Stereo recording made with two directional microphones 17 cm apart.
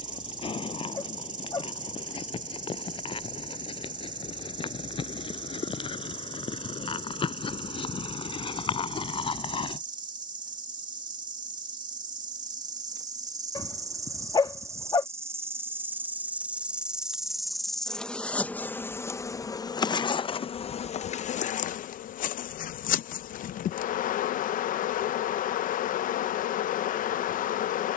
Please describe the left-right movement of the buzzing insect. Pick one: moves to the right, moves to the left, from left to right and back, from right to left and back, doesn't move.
moves to the left.